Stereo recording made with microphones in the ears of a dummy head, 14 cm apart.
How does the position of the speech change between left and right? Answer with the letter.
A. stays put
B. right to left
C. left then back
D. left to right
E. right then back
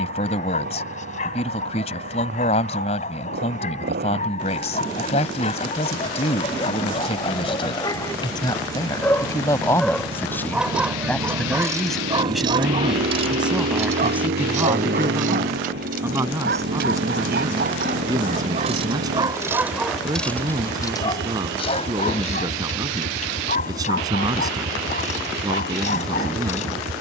D.